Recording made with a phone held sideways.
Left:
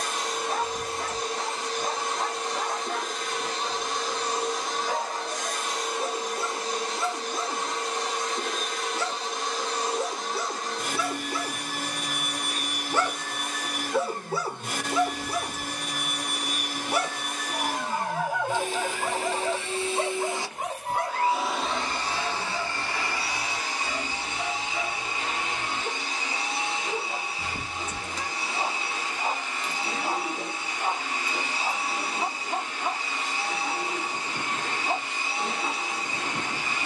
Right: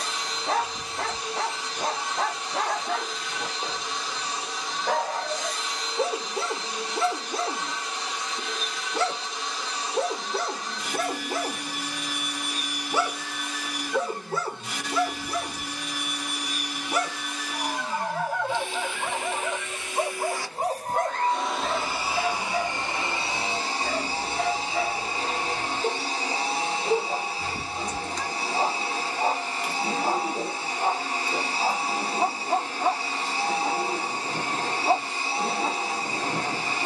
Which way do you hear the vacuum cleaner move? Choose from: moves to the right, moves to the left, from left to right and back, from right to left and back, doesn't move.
moves to the right.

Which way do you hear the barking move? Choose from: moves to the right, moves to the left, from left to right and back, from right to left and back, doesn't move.
from right to left and back.